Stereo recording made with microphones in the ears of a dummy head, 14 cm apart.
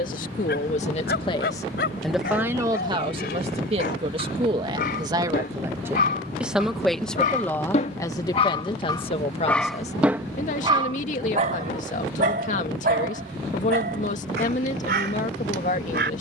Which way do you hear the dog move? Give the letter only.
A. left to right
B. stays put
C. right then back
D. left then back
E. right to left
A.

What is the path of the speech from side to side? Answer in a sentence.
You can hear the speech go right and come back.